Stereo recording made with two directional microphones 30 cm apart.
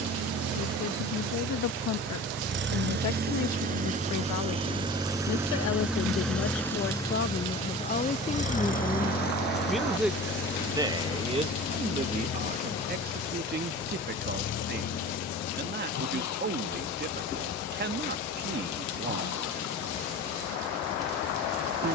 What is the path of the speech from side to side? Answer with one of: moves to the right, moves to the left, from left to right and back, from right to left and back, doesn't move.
moves to the right.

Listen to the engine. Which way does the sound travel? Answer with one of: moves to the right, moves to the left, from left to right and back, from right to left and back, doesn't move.
moves to the left.